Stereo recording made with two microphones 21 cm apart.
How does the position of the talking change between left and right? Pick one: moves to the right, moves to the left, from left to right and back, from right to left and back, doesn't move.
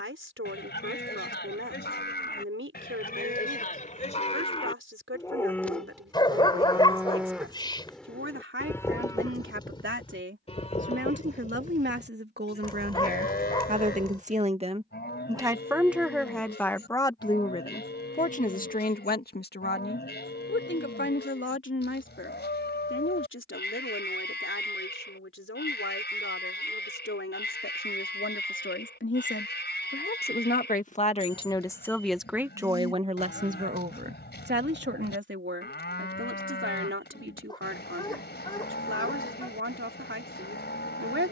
from right to left and back.